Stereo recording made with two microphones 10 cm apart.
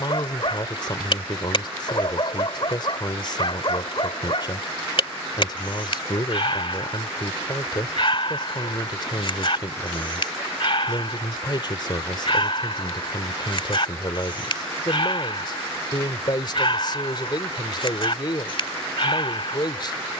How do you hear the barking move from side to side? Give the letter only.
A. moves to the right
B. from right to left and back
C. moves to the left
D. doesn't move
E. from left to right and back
D.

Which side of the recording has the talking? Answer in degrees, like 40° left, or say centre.
40° left.